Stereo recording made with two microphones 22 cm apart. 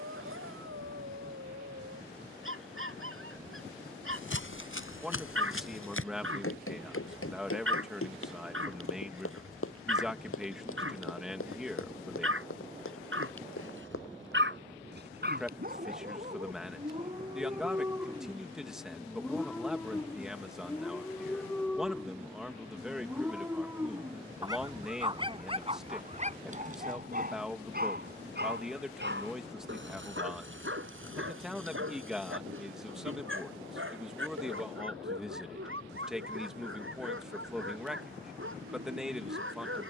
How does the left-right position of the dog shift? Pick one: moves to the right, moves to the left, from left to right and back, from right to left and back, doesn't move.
from right to left and back.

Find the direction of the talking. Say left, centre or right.
centre.